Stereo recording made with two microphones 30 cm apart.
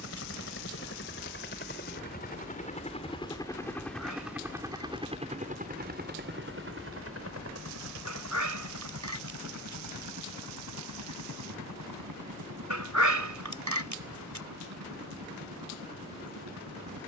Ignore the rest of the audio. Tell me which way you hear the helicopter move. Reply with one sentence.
You can hear the helicopter go from the left side to the right.